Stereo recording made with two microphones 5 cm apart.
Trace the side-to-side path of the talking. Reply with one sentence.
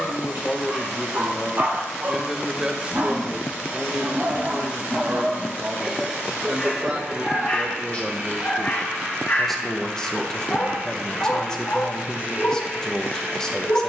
In this clip you hear the talking go right and come back.